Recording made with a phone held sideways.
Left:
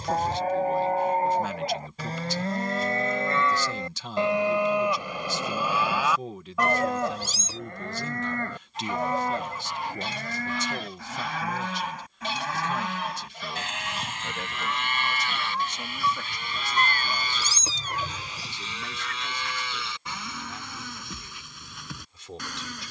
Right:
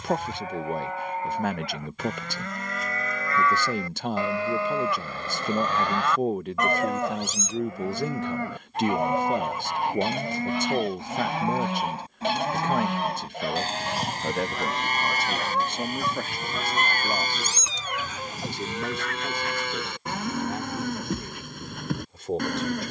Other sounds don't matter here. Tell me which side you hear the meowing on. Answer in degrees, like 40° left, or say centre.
40° left.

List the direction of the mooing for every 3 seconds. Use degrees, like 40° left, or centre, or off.
40° left, 20° left, centre, 20° right, 40° right, 40° right, 50° right, 50° right.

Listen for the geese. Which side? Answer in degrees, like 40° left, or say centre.
60° right.